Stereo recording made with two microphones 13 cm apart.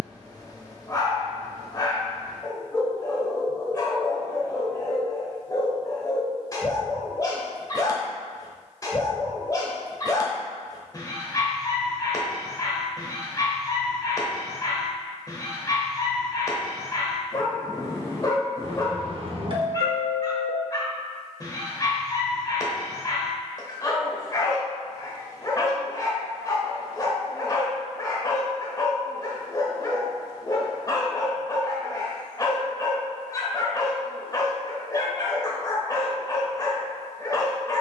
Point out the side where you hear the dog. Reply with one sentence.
You can hear the dog on the left.